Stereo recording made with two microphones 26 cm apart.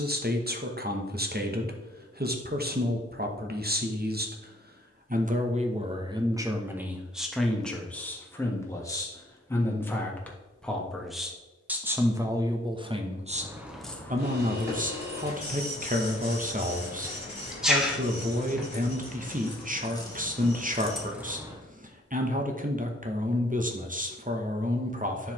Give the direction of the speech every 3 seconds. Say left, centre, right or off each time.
right, right, centre, centre, right, right, right, right, right.